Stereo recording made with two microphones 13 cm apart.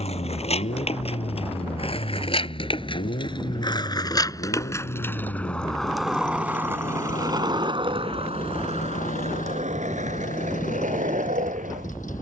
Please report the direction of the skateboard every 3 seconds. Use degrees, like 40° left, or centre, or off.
50° left, 20° left, 30° right, 70° right.